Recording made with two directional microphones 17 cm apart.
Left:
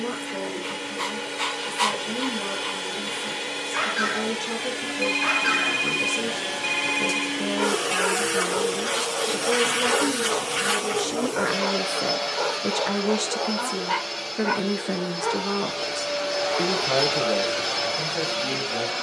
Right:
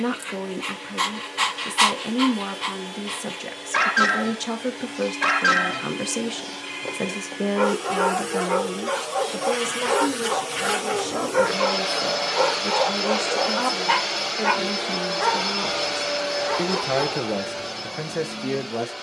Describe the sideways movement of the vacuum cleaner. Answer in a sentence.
You can hear the vacuum cleaner move from left to right and back again.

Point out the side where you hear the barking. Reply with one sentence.
You can hear the barking on the right.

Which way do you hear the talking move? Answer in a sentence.
You can hear the talking go left and come back.